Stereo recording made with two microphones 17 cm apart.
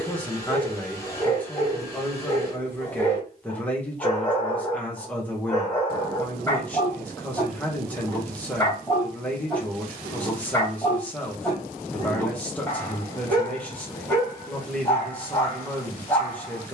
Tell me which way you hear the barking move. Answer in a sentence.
You can hear the barking stay put.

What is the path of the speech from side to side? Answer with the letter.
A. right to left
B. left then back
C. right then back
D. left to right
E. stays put
E.